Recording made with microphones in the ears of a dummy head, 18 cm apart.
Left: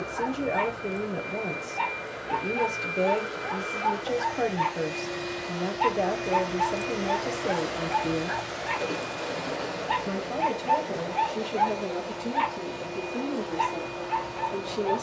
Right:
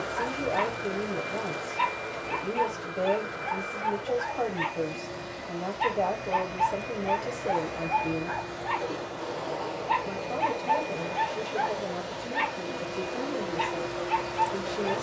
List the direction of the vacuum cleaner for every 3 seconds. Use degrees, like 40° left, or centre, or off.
10° right, 60° left, 50° left, 10° left, 20° right.